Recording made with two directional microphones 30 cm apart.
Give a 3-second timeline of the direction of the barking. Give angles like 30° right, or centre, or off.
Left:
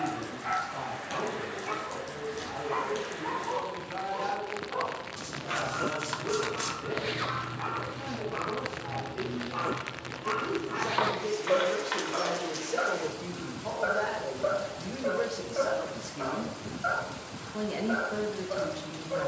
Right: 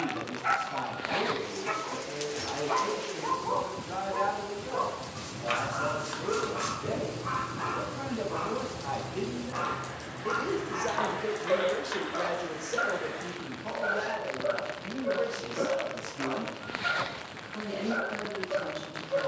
60° right, 50° right, 30° right, centre, 30° left, 50° left, 50° left.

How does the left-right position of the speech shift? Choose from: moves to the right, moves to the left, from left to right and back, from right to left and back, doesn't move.
moves to the left.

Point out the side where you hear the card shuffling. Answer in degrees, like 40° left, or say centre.
30° left.